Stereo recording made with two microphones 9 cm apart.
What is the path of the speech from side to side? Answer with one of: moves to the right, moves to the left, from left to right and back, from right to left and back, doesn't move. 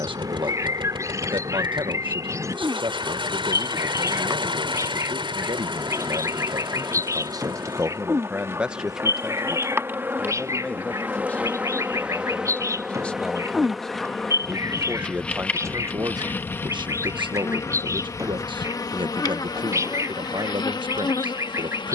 from right to left and back.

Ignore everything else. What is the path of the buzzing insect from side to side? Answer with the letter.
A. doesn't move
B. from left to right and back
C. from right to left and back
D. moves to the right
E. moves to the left
E.